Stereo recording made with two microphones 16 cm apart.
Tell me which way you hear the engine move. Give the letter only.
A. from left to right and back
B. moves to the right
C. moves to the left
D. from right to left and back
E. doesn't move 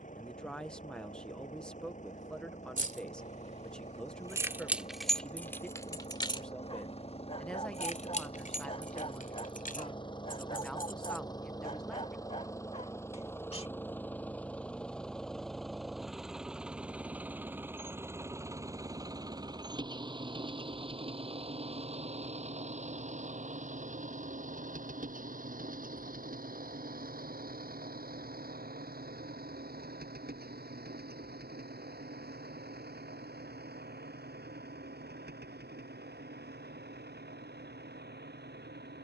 B.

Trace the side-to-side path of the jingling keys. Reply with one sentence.
You can hear the jingling keys move from right to left.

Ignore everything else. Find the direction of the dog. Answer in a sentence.
In this clip you hear the dog on the left.